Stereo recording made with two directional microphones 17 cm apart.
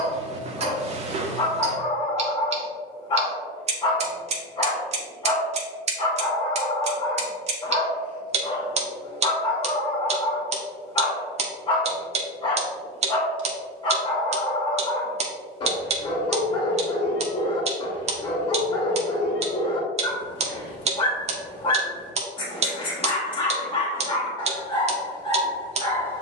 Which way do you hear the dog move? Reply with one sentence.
You can hear the dog stay in one place.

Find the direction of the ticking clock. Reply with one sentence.
You can hear the ticking clock on the right.